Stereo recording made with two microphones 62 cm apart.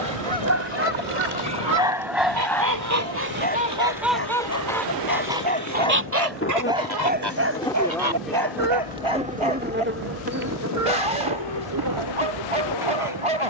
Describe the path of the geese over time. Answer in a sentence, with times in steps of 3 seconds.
You can hear the geese on the right from 0 s, in the centre from 3 s and on the right from 6 s.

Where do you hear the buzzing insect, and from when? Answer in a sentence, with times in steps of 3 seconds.
You can hear the buzzing insect on the left from 0 s, in the centre from 6 s and on the right from 9 s.